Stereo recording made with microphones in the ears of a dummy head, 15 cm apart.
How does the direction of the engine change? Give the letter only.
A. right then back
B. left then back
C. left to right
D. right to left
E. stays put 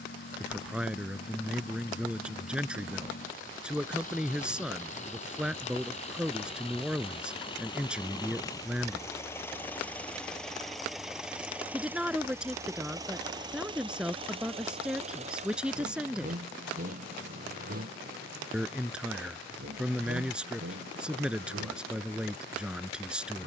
C.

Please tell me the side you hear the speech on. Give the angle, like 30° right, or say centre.
centre.